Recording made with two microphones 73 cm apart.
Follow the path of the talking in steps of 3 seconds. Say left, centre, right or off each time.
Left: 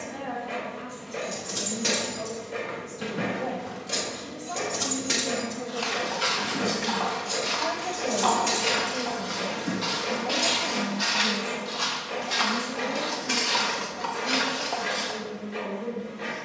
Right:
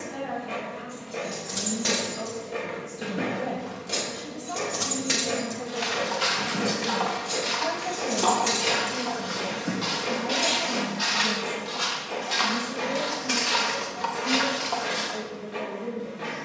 right, right, centre, left, left, left.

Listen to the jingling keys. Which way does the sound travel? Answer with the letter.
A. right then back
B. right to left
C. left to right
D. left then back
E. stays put
A.